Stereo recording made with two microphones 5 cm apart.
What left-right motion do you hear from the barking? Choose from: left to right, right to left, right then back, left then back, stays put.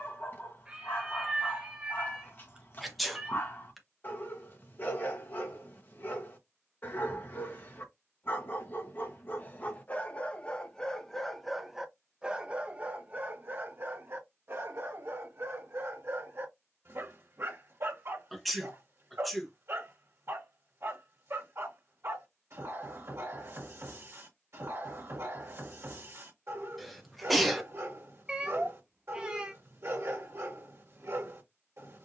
left to right.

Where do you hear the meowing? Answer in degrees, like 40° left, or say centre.
20° right.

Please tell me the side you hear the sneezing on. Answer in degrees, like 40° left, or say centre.
centre.